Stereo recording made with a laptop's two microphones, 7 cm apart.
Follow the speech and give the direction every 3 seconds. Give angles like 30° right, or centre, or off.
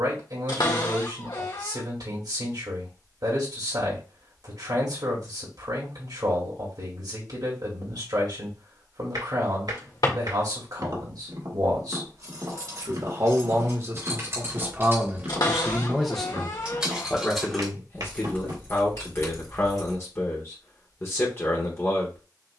70° right, 70° right, 70° right, 70° right, 40° right, 10° left, 40° left, 40° left.